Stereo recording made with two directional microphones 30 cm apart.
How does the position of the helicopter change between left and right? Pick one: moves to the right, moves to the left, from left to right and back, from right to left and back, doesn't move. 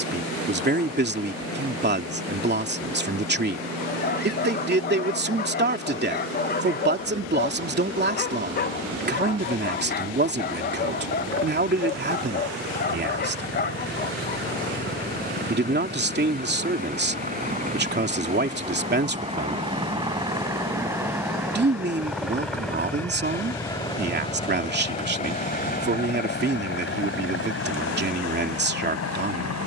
moves to the left.